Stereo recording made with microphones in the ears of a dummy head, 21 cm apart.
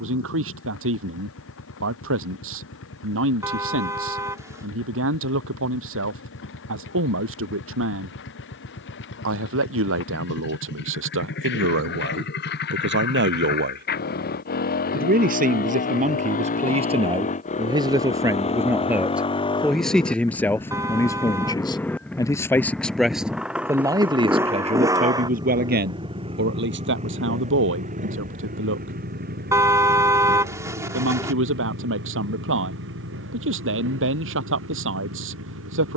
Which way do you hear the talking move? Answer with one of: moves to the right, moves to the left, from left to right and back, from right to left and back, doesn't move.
from right to left and back.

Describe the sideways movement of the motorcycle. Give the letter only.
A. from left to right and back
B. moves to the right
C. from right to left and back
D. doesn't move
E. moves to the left
B.